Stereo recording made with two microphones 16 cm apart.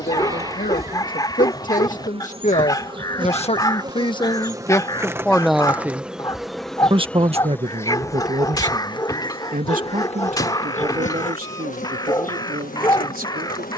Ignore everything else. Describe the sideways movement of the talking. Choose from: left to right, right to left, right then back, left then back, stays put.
left to right.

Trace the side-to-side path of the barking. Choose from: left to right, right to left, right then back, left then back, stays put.
stays put.